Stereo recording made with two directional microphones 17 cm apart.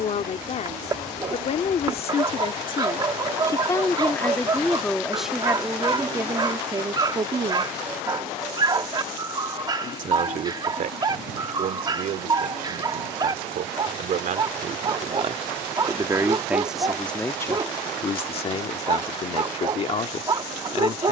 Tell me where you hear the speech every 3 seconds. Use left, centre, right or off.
left, centre, right, right, right, centre, left.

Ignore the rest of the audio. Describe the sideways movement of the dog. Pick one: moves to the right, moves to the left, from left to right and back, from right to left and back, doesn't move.
doesn't move.